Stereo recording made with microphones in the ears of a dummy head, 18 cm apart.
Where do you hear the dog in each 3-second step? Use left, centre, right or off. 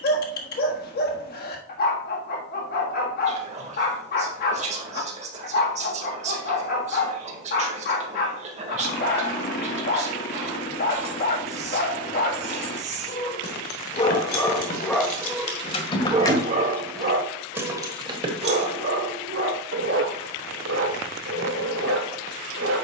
left, left, left, left, left, right, right, right.